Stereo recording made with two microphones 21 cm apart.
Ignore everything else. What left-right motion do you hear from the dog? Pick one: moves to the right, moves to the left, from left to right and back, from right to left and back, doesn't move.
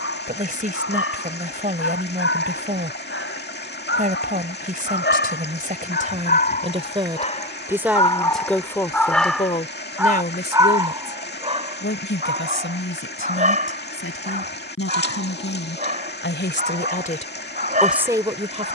moves to the right.